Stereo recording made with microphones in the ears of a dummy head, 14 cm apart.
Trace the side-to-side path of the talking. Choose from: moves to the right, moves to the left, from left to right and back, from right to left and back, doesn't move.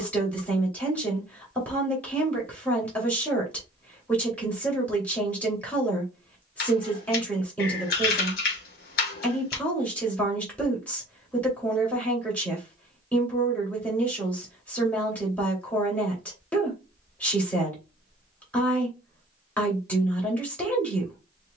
doesn't move.